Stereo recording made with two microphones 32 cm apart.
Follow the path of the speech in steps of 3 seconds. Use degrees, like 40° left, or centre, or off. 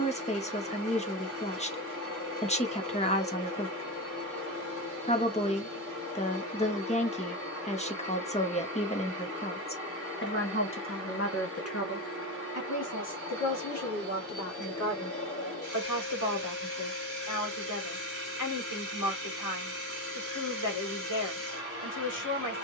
20° left, 20° left, 20° left, 40° left, 60° left, 60° left, 60° left, 60° left.